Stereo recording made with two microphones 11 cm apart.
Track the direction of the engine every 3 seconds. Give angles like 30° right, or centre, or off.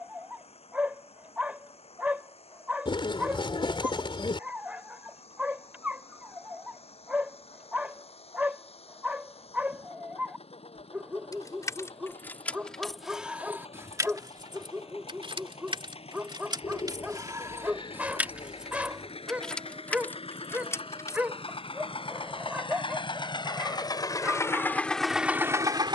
70° left, 70° left, 70° left, 70° left, 70° left, 70° left, 60° left, 50° left, centre.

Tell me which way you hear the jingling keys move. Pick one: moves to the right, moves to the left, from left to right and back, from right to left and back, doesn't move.
from left to right and back.